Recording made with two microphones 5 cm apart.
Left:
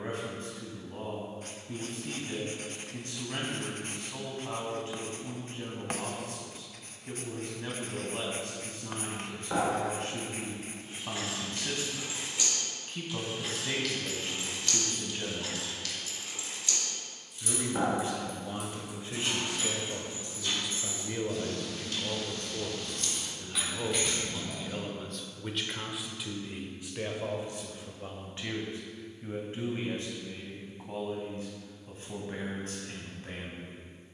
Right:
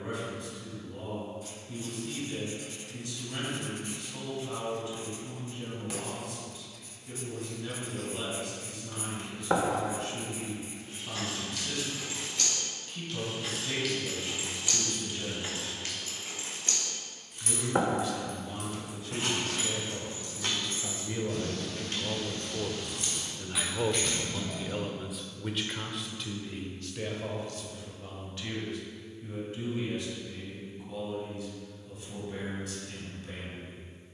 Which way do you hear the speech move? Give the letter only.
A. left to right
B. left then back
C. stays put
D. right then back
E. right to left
D.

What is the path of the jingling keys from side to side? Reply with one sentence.
In this clip you hear the jingling keys go right and come back.